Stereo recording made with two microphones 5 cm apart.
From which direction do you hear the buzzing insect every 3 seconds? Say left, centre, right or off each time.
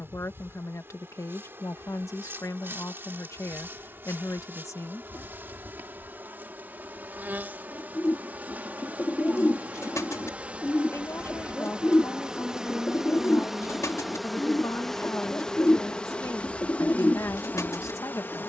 right, right, right, right, centre, left.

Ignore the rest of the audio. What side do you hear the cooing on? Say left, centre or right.
left.